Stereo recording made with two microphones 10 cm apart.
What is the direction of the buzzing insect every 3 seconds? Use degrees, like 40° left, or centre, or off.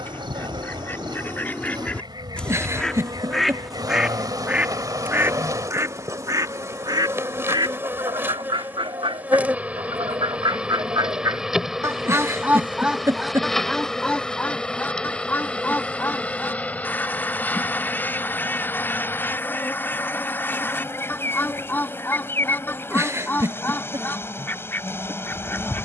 50° right, 40° right, 20° right, 10° right, centre, 20° left, 20° left, 30° left, 30° left.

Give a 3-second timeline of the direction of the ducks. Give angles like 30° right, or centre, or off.
20° left, 10° right, 50° right, 50° right, centre, 20° left, 20° left, 20° left, 20° left.